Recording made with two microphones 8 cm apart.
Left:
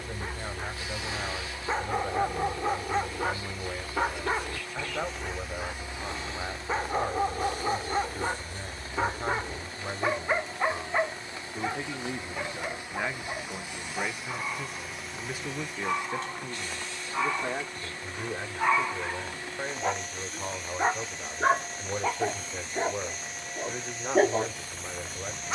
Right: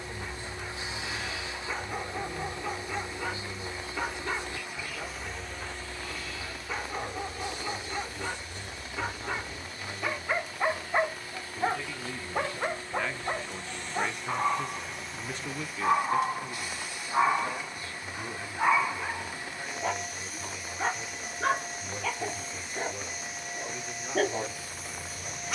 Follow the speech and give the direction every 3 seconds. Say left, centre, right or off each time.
left, left, left, left, centre, left, left, left, left.